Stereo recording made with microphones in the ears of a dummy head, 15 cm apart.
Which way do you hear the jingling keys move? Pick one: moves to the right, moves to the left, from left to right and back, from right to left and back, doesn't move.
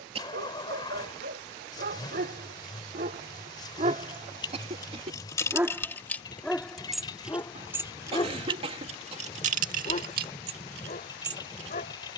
moves to the right.